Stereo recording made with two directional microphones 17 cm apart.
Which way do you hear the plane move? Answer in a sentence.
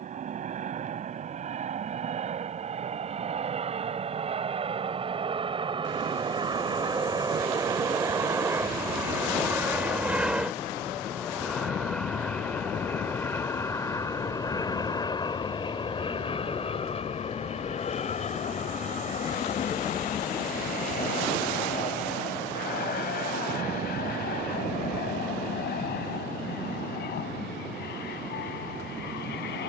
You can hear the plane go from the right side to the left.